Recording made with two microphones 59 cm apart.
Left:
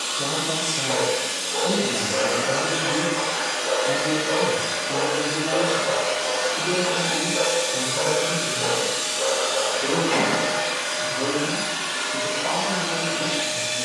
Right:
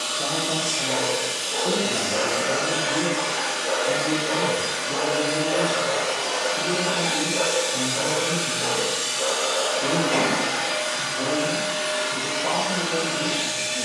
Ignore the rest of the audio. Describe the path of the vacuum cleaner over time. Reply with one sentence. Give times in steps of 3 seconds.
You can hear the vacuum cleaner on the left from 0 s, in the centre from 6 s, on the right from 9 s and on the left from 12 s.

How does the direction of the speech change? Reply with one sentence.
You can hear the speech go from the left side to the right.